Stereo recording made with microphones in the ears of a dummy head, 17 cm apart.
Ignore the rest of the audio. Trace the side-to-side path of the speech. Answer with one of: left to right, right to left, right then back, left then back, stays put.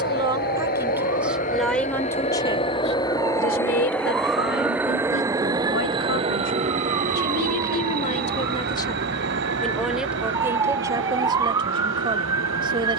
left then back.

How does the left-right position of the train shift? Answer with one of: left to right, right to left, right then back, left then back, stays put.
left to right.